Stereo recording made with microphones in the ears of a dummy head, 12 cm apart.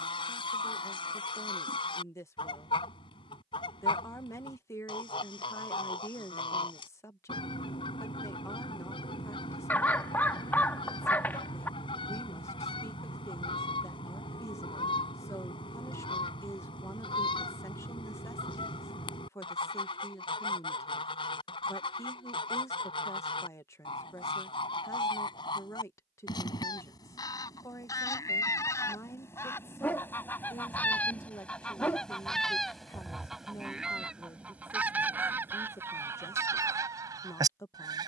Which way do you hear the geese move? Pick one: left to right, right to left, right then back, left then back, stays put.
left to right.